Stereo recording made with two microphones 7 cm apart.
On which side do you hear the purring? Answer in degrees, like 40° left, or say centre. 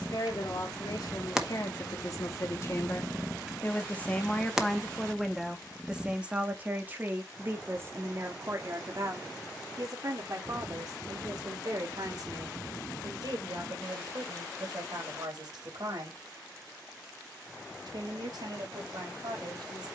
10° right.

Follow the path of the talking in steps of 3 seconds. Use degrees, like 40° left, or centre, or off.
50° left, 10° left, 30° right, 50° right, 60° right, 60° right, 70° right.